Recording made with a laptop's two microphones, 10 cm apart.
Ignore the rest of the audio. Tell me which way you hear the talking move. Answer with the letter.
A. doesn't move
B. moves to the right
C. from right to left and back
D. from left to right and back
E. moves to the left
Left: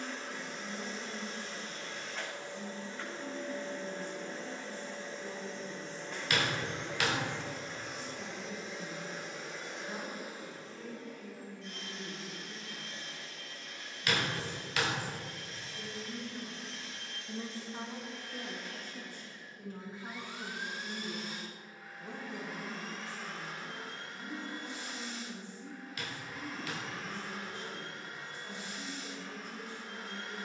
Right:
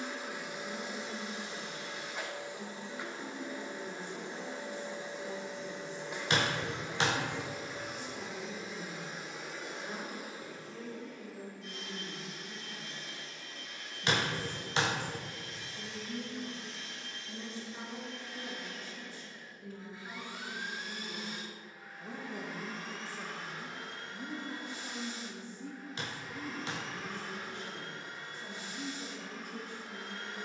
C.